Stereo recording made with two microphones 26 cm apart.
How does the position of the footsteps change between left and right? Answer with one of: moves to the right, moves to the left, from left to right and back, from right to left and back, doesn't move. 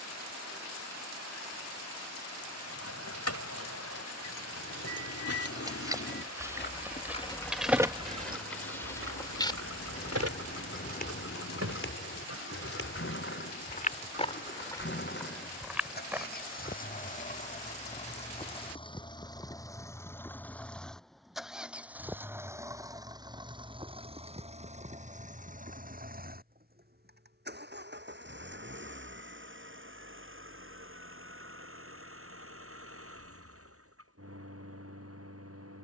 from right to left and back.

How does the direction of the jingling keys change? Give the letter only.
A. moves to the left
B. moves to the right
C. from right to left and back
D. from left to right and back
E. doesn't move
B.